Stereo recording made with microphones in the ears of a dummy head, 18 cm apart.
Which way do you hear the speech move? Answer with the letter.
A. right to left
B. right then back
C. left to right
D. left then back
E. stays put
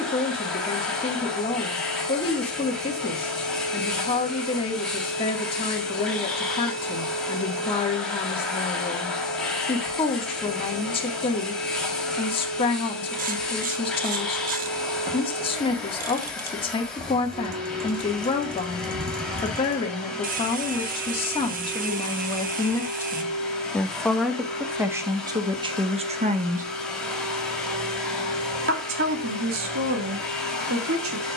C.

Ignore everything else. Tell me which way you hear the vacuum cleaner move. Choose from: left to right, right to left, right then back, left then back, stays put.
stays put.